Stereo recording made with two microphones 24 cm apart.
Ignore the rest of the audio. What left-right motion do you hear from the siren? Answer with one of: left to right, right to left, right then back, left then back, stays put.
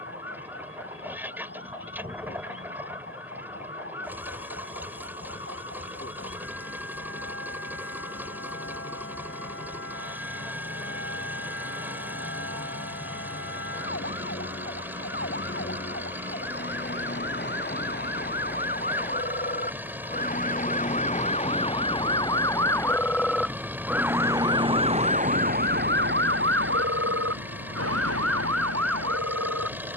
left to right.